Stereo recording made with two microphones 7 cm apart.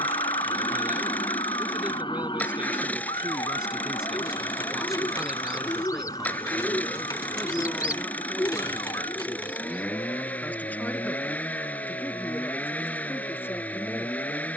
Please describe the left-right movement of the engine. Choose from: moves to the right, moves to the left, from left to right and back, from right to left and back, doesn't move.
doesn't move.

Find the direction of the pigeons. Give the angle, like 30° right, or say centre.
50° left.